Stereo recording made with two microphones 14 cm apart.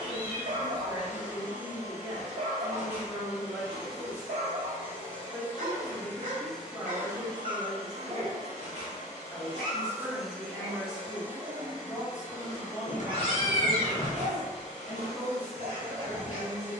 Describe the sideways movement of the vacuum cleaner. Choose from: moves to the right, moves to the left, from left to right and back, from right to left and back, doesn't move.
from left to right and back.